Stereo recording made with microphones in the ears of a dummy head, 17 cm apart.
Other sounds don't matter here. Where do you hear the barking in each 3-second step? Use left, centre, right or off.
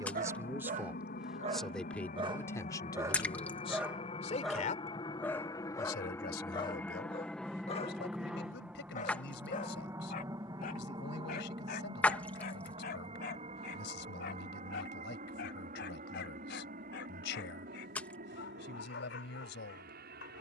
right, centre, left, left, left, left, left.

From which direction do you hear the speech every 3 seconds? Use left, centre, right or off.
centre, left, left, left, left, left, left.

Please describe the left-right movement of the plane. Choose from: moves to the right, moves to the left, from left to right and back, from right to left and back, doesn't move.
moves to the right.